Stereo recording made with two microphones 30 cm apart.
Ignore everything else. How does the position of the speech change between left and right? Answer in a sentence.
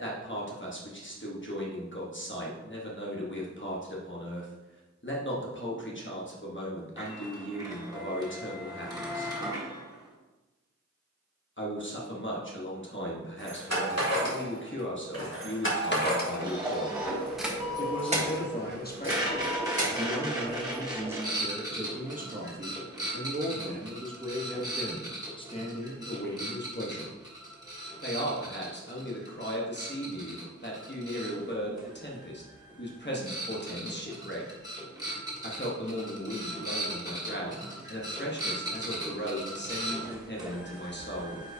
You can hear the speech move from left to right and back again.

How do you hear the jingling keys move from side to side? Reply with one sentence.
In this clip you hear the jingling keys travel towards the right.